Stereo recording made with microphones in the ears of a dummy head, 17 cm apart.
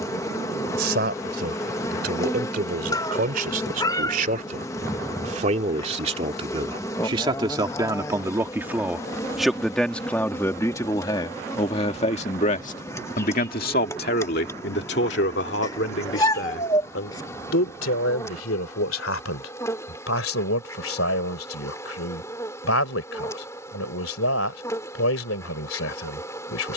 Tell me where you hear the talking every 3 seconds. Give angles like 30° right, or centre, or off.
50° right, 40° right, 20° right, 10° left, 50° left, 70° left, 80° left, 80° left, 80° left.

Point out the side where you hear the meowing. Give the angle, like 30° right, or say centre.
20° left.